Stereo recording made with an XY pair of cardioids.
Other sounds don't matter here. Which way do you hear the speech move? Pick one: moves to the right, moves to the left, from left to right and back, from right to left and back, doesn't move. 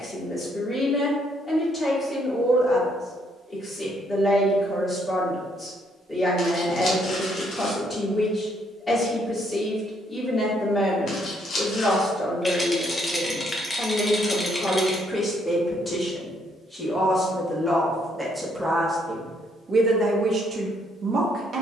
moves to the right.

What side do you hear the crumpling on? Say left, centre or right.
left.